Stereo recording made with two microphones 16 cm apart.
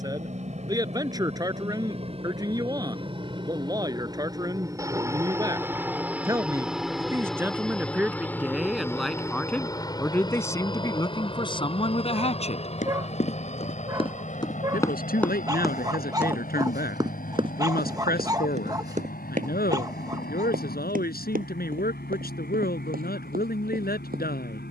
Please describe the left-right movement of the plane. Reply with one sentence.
You can hear the plane travel towards the left.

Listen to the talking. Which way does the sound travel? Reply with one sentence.
In this clip you hear the talking travel towards the left.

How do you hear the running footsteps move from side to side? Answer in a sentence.
In this clip you hear the running footsteps move from left to right.